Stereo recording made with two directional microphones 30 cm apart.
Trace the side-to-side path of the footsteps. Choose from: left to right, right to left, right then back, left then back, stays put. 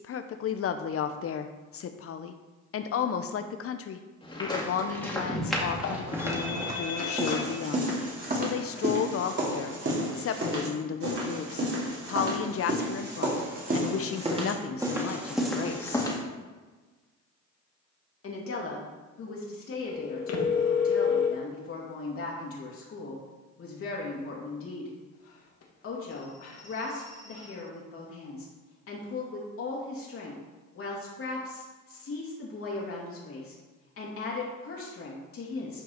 right then back.